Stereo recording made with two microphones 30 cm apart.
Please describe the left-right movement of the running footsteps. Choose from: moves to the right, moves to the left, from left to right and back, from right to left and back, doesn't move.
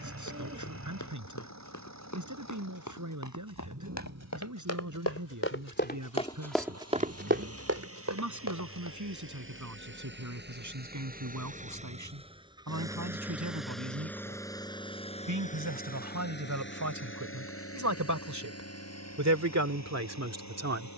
moves to the right.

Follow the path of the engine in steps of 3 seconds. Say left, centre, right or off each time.
right, right, right, right, centre, left, left.